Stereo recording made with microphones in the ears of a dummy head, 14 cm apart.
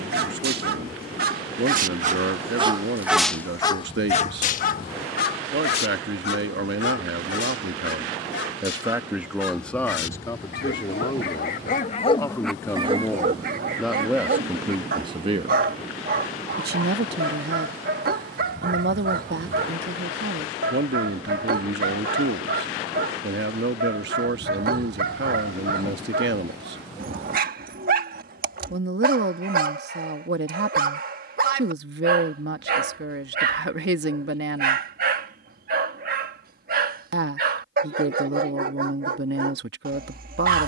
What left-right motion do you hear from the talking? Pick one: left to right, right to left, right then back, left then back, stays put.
left then back.